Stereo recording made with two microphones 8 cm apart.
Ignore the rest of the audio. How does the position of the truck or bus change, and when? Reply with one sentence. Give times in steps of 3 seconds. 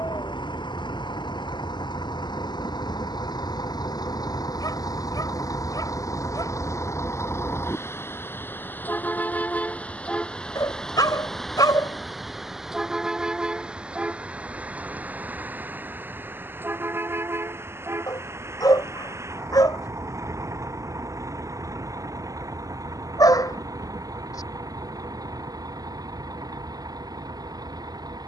In this clip you hear the truck or bus on the left from 0 s, in the centre from 9 s and on the right from 15 s.